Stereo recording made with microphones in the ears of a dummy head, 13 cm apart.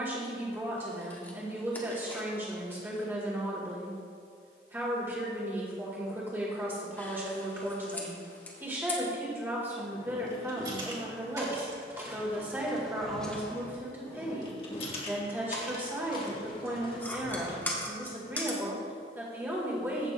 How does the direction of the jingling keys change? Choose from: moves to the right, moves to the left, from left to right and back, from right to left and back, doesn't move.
moves to the left.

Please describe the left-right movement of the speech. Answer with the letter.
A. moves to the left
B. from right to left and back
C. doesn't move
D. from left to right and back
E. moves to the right
C.